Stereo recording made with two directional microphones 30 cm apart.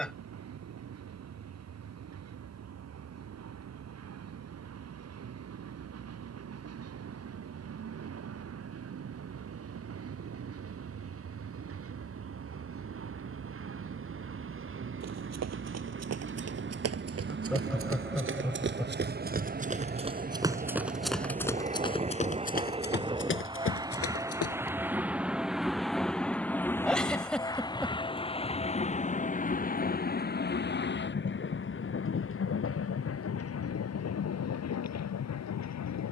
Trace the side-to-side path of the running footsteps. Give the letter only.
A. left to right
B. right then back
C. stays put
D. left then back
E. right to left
E.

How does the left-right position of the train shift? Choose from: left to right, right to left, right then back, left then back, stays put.
right to left.